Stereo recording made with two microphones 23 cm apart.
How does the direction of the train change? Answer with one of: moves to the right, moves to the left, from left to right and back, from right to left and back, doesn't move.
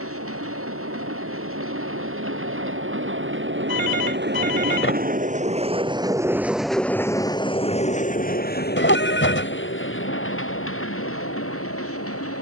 moves to the left.